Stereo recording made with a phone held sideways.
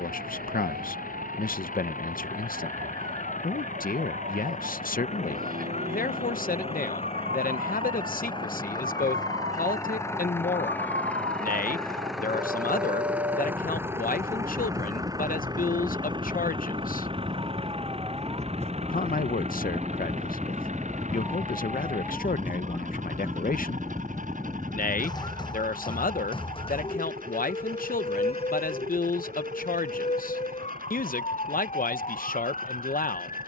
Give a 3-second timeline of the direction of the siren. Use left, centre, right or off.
right, right, right, right, right, right, centre, centre, left, left, left.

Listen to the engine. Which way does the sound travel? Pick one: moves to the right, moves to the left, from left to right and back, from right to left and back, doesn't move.
moves to the right.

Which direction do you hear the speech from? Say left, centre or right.
left.